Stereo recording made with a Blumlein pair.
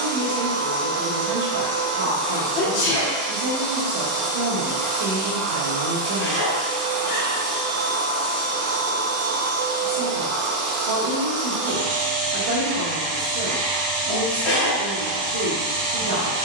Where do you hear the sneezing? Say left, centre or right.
left.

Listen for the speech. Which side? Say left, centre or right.
right.